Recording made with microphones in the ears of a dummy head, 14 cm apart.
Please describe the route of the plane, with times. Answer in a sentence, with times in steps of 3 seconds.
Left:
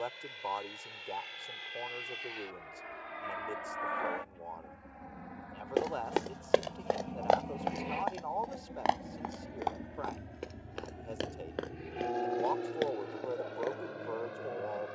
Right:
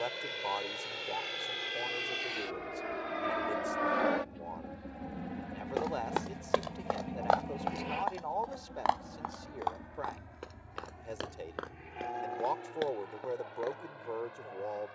In this clip you hear the plane on the right from 0 s, in the centre from 6 s and on the left from 9 s.